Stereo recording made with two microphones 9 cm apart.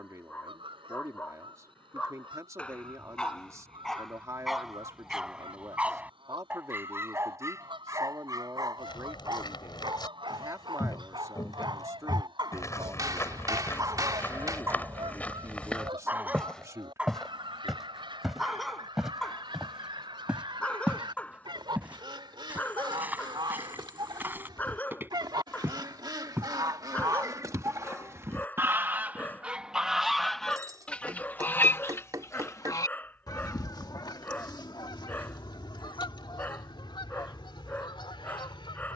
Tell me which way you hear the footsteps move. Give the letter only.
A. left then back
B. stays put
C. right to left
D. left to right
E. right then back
D.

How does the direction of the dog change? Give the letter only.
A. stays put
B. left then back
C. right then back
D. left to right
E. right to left
C.